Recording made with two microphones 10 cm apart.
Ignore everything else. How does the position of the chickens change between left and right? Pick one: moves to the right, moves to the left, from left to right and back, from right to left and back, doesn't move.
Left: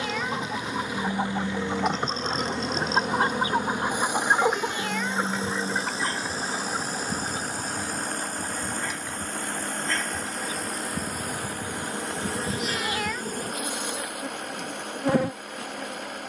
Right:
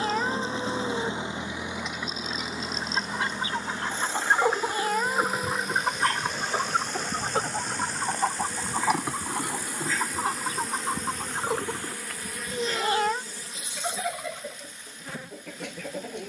moves to the right.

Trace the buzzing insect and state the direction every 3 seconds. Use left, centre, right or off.
left, left, centre, centre, left, left.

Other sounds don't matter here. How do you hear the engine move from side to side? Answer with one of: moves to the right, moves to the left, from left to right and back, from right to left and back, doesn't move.
moves to the left.